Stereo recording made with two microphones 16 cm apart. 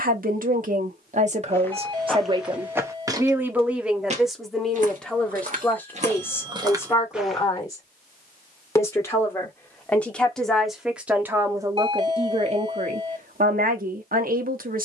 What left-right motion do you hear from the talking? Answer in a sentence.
In this clip you hear the talking move from right to left and back again.